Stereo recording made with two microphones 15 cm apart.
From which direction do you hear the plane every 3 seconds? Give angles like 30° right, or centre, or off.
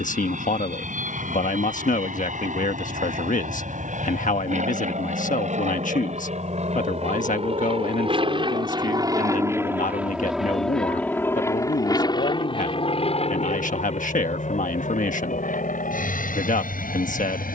70° right, 70° right, 50° right, centre, 40° left, 60° left.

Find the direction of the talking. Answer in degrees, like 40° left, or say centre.
60° left.